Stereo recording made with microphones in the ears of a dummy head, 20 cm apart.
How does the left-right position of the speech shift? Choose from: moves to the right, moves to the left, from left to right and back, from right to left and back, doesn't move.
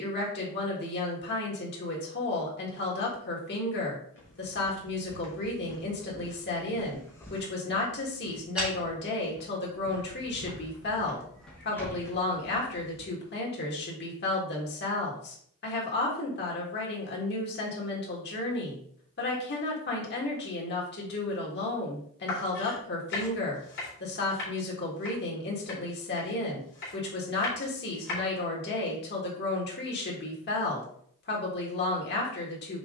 doesn't move.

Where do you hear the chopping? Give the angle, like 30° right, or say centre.
50° left.